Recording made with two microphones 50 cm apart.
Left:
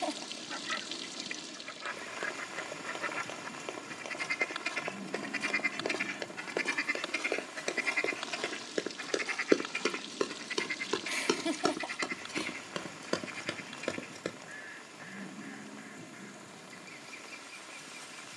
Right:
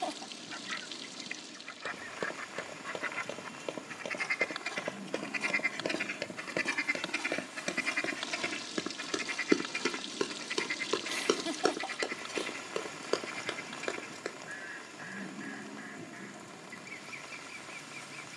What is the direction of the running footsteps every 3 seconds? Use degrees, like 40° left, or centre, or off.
60° right, 50° right, 40° right, centre, 40° left, off.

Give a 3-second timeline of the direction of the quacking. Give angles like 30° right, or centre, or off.
70° left, 50° left, 20° right, 60° right, 70° right, 80° right.